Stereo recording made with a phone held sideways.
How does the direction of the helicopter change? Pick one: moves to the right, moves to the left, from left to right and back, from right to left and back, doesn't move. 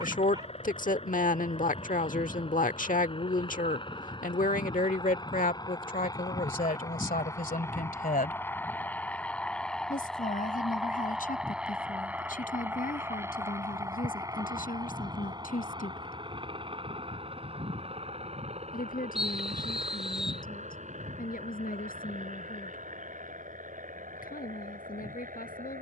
moves to the right.